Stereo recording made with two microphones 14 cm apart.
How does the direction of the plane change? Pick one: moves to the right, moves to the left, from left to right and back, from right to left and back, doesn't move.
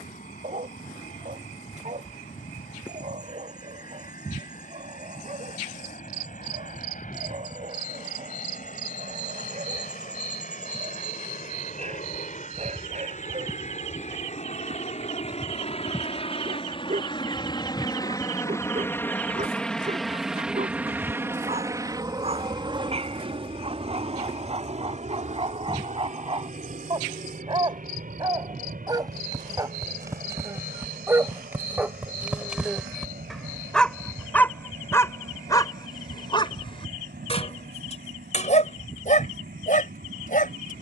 moves to the right.